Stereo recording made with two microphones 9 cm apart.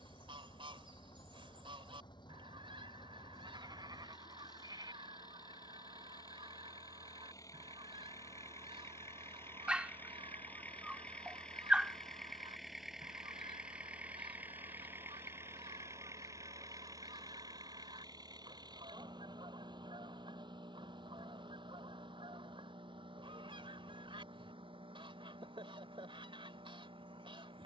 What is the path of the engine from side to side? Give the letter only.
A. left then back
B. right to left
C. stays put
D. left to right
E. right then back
D.